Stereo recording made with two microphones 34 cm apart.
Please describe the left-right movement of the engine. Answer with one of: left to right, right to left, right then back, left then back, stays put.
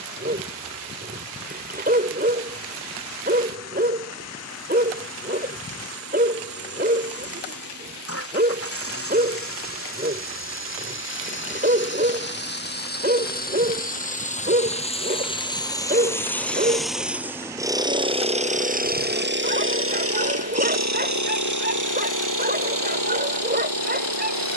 left to right.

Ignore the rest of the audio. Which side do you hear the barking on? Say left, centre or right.
right.